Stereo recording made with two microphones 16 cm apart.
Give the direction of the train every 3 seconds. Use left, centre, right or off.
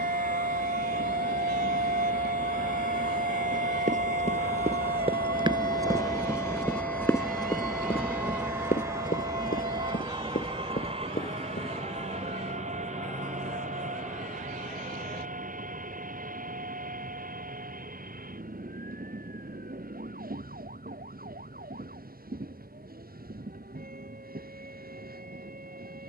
left, left, centre, right, right, right, right, right, right.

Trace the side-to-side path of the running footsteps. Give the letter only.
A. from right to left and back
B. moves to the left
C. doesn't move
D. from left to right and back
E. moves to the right
B.